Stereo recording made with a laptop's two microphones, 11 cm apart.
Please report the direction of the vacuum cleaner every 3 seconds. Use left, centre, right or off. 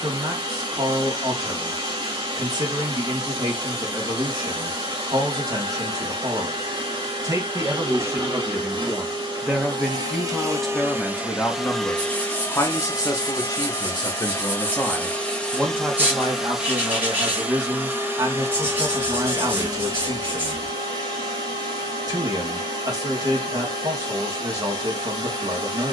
right, right, right, right, left, centre, right, right, right.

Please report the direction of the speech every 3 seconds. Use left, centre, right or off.
right, right, right, centre, left, right, right, right, right.